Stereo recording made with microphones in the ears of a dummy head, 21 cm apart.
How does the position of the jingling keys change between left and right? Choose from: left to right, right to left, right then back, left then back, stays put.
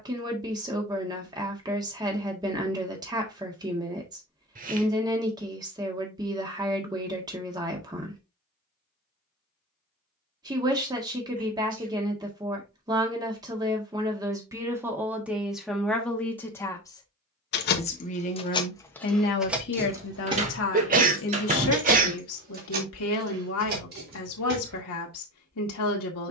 left to right.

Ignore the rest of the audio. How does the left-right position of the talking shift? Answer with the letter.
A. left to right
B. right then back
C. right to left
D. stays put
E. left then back
C.